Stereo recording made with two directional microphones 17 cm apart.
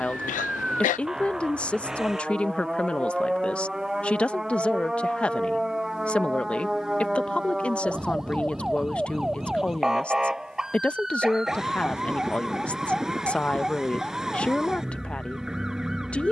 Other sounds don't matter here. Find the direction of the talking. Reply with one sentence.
You can hear the talking in the centre.